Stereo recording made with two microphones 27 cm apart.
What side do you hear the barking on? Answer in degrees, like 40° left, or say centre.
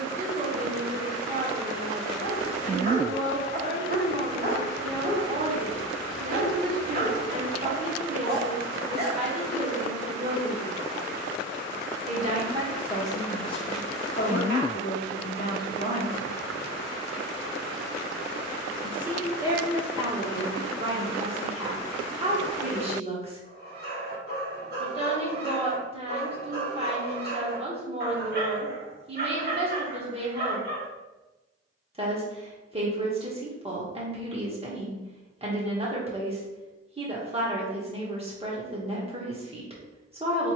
40° right.